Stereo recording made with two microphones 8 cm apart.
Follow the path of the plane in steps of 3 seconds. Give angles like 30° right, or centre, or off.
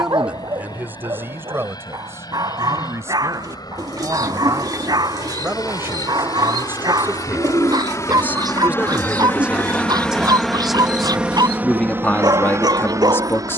70° left, 70° left, 50° left, centre, 40° right.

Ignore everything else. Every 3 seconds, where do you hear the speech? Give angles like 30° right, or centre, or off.
30° right, 30° right, 20° right, centre, 30° left.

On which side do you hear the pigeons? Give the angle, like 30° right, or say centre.
50° right.